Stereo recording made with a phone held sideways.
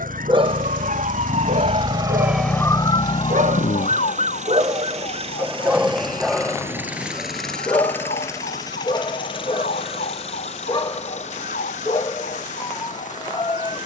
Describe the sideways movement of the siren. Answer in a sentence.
You can hear the siren go from the right side to the left.